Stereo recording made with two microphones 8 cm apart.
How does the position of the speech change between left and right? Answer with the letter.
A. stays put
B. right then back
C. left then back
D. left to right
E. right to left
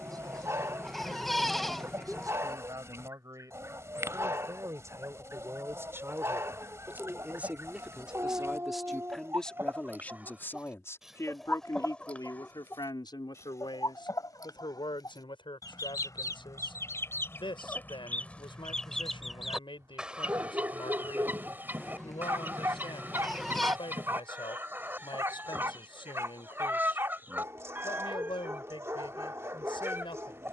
E.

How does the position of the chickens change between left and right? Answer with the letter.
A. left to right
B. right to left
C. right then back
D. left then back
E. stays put
D.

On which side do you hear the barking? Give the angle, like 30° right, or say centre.
30° right.